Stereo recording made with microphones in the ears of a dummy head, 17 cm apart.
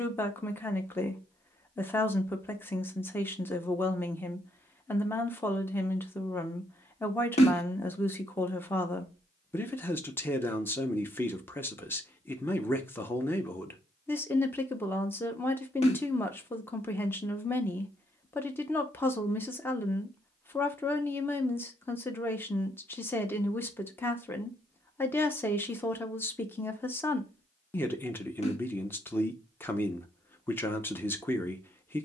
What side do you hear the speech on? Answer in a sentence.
In this clip you hear the speech in the centre.